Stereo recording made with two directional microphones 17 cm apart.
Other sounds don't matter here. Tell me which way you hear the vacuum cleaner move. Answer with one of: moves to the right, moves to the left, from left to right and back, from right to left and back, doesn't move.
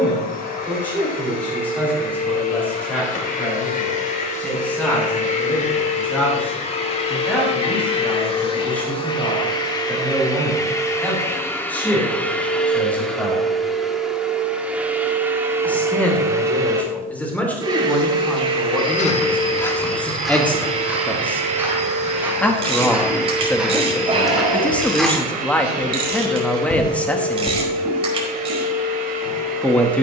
moves to the right.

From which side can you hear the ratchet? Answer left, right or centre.
right.